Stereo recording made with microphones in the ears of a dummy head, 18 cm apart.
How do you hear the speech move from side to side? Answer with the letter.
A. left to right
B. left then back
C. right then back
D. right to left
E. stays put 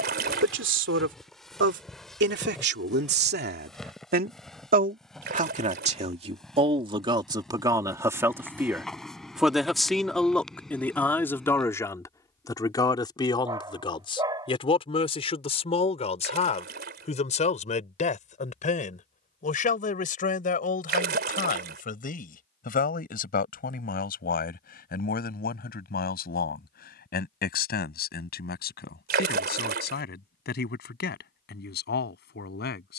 D.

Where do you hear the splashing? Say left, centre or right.
right.